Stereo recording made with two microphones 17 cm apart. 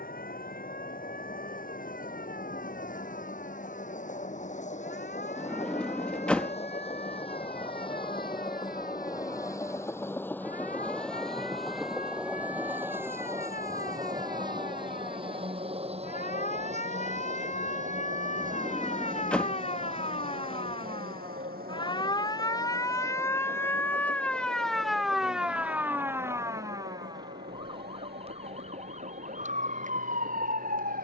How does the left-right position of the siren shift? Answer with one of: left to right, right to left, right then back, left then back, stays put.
left to right.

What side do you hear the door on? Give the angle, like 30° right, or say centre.
10° left.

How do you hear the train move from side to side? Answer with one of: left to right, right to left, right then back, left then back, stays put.
left to right.